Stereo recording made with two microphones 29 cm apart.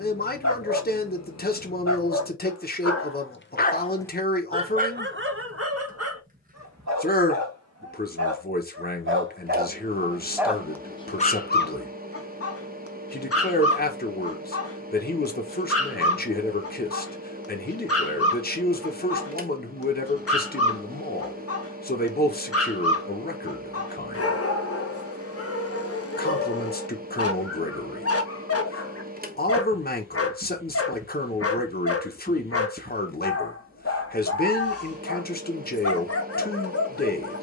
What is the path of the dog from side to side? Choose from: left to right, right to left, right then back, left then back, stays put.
right then back.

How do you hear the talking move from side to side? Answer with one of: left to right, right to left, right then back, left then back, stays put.
stays put.